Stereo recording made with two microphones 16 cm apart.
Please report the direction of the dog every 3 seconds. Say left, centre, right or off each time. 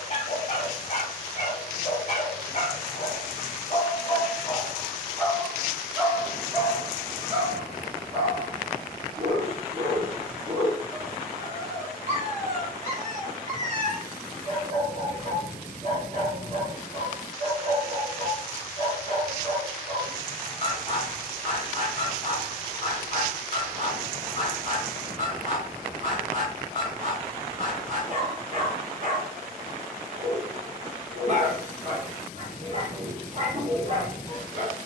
left, left, right, right, right, right, right, right, right, right, right, right.